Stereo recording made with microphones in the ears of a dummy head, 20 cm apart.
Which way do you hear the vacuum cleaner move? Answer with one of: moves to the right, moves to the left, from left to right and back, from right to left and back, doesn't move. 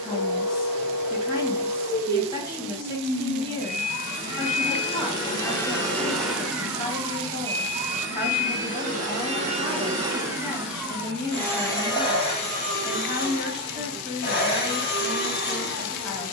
from left to right and back.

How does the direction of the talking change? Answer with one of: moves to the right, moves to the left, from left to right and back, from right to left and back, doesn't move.
doesn't move.